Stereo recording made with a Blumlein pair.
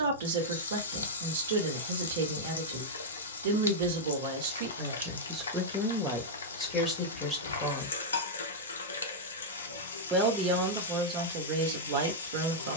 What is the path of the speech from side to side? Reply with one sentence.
In this clip you hear the speech go left and come back.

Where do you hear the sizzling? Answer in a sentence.
You can hear the sizzling on the left.